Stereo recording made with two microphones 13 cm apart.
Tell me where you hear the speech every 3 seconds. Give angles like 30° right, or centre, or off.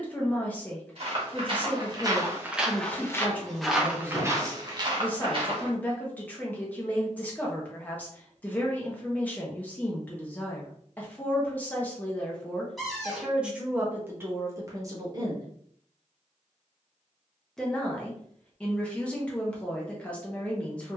10° left, 10° left, 10° left, 10° left, 10° right, 10° right, 10° left.